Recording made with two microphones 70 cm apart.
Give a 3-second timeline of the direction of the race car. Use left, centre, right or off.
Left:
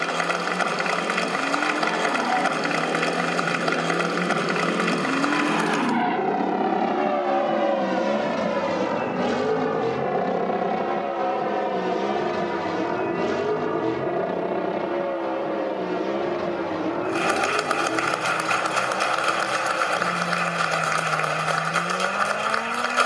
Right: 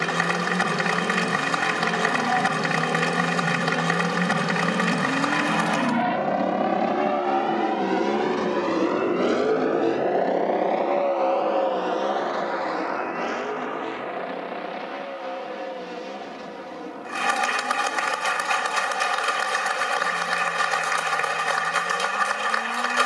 right, right, centre, left, left, left, left, left.